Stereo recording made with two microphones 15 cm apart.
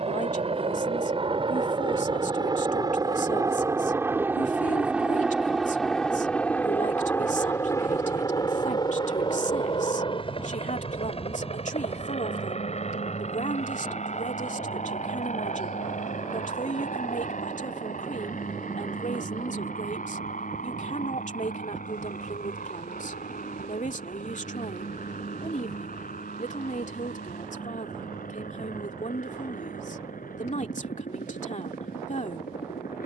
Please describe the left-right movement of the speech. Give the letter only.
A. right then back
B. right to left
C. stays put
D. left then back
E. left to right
C.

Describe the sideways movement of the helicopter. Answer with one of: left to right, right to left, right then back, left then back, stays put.
right to left.